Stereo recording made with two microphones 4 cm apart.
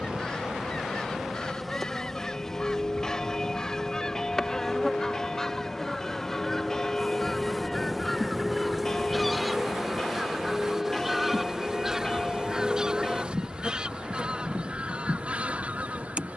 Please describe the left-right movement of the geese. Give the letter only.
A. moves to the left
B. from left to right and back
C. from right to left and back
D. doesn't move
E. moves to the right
E.